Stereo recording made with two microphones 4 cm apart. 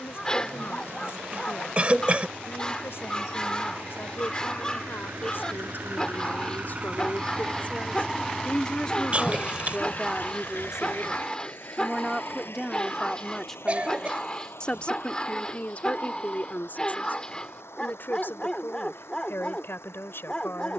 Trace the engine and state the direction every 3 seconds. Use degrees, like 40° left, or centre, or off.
80° right, 60° right, 20° right, 50° left, 70° left, 80° left, 80° left.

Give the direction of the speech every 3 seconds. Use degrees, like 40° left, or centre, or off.
70° left, 60° left, 40° left, 10° right, 10° left, 40° left, 60° left.